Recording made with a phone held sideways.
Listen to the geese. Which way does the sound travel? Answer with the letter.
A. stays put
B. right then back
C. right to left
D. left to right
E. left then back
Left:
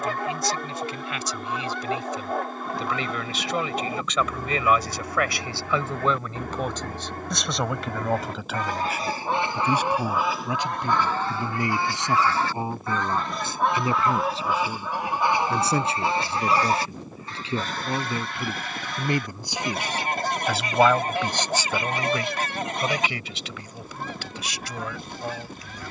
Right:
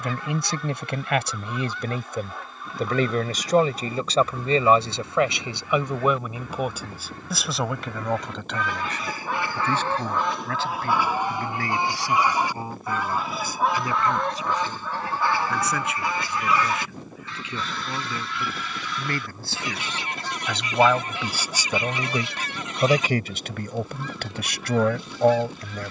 B.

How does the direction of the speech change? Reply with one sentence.
You can hear the speech go left and come back.